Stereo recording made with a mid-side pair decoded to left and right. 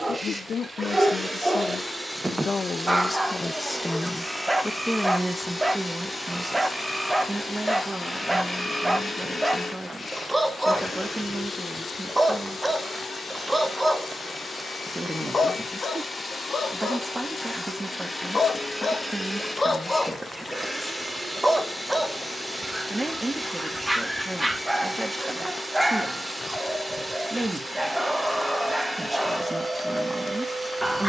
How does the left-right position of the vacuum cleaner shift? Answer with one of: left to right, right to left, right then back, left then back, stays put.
left then back.